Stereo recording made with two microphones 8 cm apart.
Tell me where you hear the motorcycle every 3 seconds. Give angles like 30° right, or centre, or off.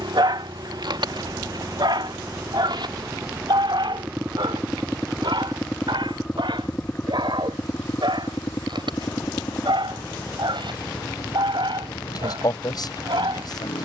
50° right, 10° right, 20° left, 50° left, 60° left.